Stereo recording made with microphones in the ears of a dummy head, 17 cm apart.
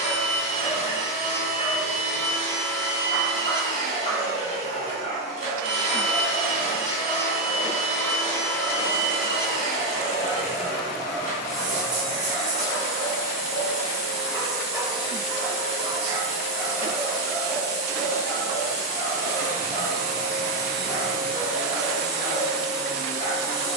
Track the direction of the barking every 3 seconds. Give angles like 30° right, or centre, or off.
30° left, 30° left, 30° left, 30° left, 20° left, 10° right, 30° left, 30° left.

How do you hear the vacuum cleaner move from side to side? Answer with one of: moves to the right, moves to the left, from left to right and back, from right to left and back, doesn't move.
doesn't move.